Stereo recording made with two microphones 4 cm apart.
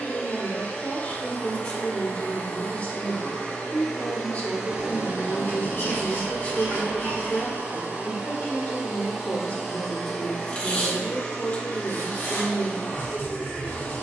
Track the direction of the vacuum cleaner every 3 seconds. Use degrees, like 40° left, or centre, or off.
30° left, 10° right, 40° right, 10° left, 20° left.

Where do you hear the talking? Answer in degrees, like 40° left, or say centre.
30° left.